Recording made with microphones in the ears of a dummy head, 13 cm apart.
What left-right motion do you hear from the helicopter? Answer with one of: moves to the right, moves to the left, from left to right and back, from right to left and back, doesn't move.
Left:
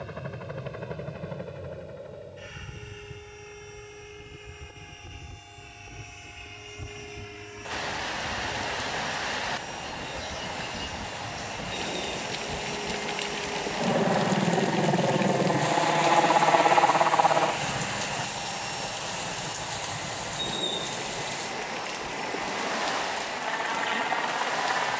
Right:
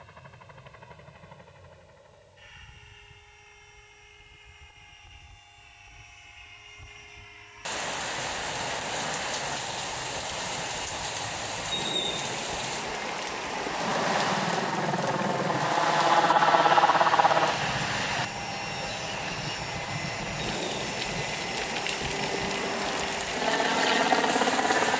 moves to the right.